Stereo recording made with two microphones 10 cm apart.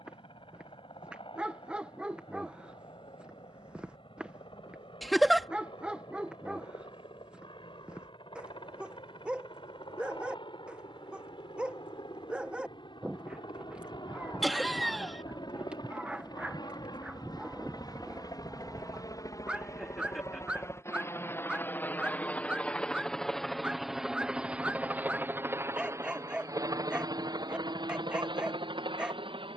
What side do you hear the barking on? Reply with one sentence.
In this clip you hear the barking in the centre.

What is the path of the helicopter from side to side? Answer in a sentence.
You can hear the helicopter go from the left side to the right.